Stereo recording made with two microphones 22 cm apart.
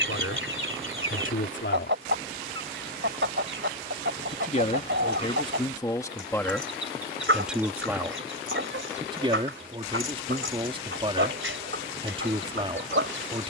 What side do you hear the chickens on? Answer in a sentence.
You can hear the chickens on the right.